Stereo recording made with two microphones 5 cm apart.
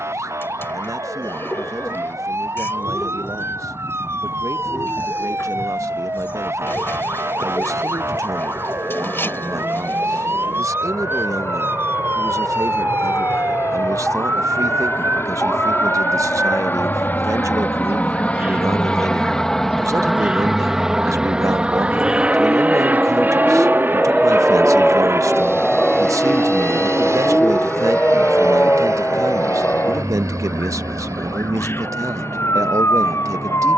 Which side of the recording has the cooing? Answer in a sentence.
You can hear the cooing on the left.